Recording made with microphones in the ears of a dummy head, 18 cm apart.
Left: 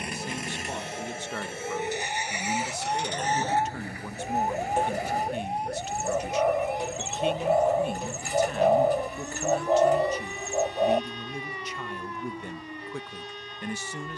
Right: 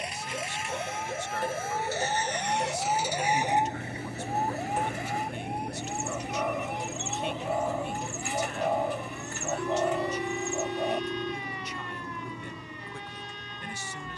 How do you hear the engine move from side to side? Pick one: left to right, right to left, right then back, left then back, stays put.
left to right.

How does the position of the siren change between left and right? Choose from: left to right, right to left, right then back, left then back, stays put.
right to left.